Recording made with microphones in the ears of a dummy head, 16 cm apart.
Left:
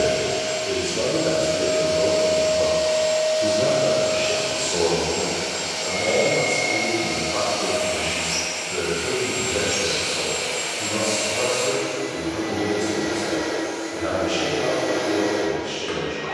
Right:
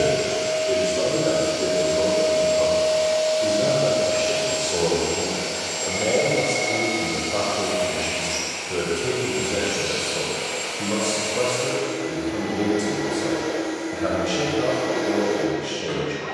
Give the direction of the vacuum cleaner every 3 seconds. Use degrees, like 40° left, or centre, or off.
60° right, 40° right, 10° right, 20° left, 40° left, 50° left.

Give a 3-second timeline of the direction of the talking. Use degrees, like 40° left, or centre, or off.
20° left, 10° right, 40° right, 50° right, 50° right, 50° right.